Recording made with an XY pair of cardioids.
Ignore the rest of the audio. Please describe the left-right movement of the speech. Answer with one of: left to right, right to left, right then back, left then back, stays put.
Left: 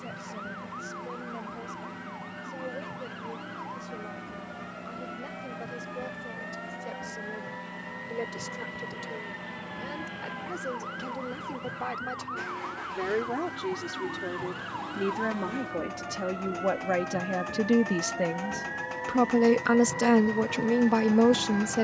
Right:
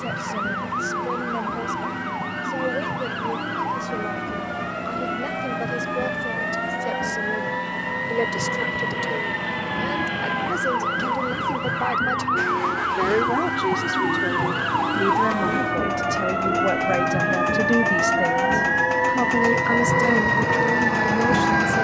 right to left.